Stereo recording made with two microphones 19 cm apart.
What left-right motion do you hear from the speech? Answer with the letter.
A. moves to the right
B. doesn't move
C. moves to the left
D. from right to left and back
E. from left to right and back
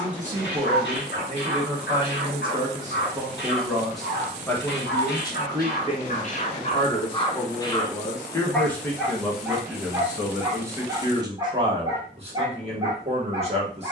D.